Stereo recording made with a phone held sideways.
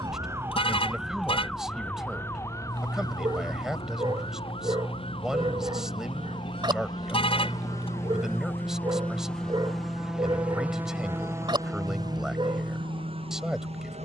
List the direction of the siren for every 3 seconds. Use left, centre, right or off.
centre, left, left, left, left.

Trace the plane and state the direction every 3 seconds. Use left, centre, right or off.
left, left, left, centre, right.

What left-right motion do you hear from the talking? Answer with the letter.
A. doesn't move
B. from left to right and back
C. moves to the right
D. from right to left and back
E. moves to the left
A.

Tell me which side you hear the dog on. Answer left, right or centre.
right.